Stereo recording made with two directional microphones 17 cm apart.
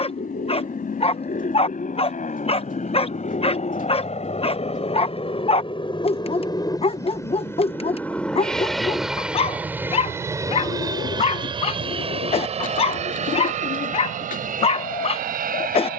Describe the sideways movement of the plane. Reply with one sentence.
In this clip you hear the plane travel towards the right.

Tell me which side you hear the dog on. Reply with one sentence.
In this clip you hear the dog on the left.